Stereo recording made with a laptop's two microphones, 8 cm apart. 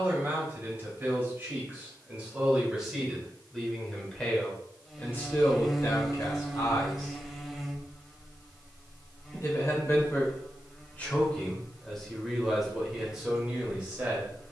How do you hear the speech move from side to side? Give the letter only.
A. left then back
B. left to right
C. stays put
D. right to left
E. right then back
A.